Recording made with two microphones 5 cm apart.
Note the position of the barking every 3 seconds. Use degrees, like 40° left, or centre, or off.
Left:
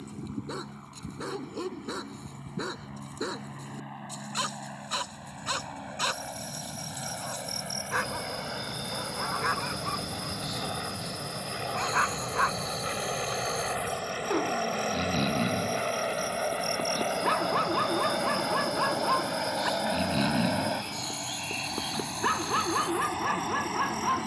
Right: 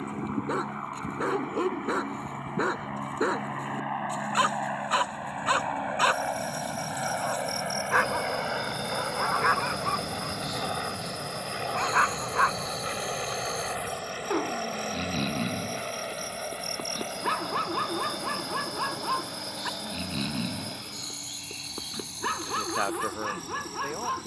30° right, 30° right, 20° right, 20° right, 10° right, centre, 10° left, 10° left.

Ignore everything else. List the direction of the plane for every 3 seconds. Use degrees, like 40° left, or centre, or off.
50° right, 40° right, 30° right, 20° right, centre, 20° left, 40° left, 50° left.